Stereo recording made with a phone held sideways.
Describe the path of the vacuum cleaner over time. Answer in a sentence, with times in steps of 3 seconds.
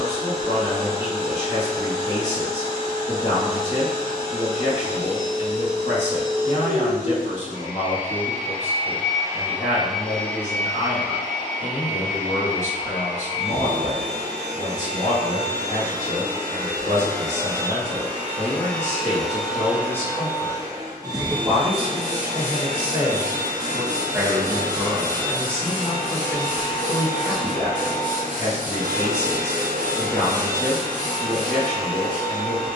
You can hear the vacuum cleaner on the right from 0 s, in the centre from 9 s, on the left from 12 s, in the centre from 18 s and on the right from 21 s.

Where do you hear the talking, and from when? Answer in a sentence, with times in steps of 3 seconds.
You can hear the talking on the left from 0 s, on the right from 21 s, in the centre from 24 s and on the left from 27 s.